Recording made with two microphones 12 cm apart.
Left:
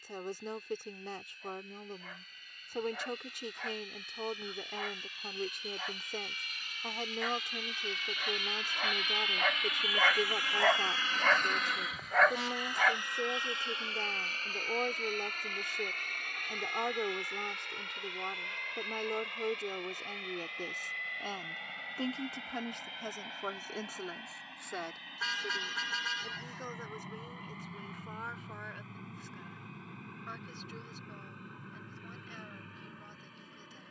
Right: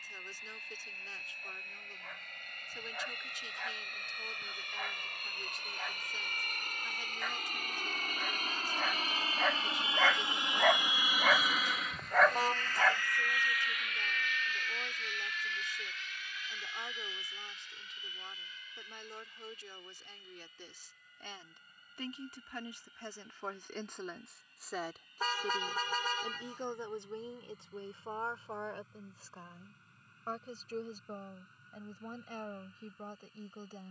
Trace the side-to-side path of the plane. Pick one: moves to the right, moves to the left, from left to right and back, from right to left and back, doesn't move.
moves to the left.